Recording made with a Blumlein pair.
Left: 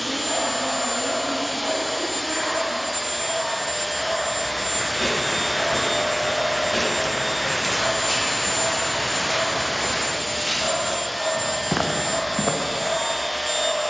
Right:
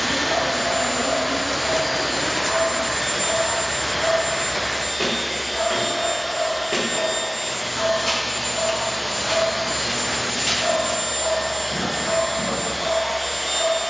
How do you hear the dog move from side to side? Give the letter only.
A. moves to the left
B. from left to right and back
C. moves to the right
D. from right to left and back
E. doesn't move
E.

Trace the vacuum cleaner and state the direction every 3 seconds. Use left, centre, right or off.
right, right, centre, right, right.